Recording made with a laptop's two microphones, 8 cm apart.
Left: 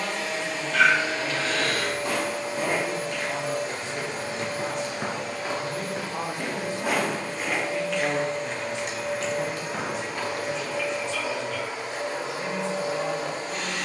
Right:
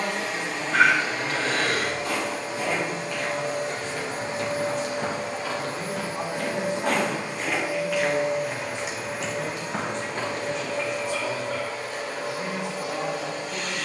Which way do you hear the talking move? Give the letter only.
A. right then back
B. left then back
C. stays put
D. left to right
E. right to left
B.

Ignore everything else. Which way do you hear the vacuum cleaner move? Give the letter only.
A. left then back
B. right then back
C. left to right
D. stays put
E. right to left
E.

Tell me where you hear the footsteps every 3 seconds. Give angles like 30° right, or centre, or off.
50° left, 40° left, centre, 20° right, off.